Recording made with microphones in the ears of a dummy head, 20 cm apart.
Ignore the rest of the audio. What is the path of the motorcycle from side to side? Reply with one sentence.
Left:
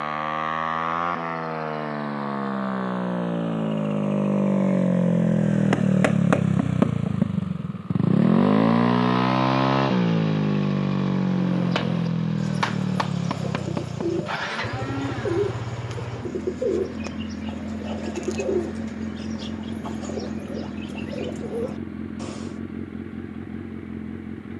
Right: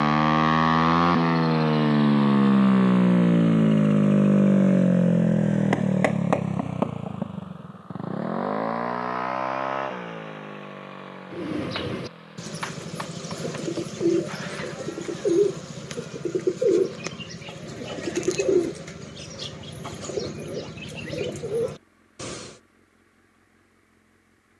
You can hear the motorcycle move to the left.